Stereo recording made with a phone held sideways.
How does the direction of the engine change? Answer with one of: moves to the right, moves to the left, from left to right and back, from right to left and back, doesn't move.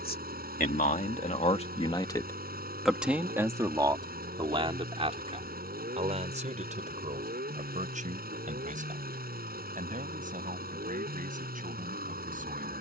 doesn't move.